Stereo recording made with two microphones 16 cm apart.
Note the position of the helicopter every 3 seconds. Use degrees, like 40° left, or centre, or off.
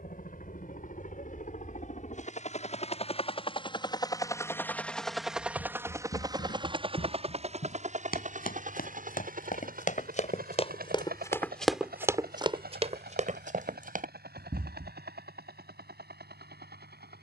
60° left, 10° left, 40° right, 60° right, 70° right, 70° right.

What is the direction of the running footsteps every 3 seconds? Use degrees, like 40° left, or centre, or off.
off, 80° left, 70° left, 40° left, 50° right, off.